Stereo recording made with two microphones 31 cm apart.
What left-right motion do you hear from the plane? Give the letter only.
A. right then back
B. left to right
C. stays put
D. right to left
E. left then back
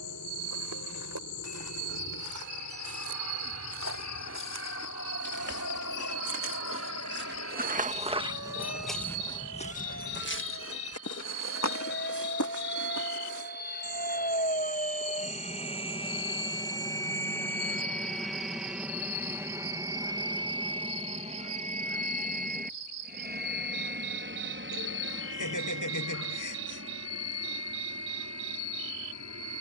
B.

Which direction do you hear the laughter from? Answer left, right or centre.
left.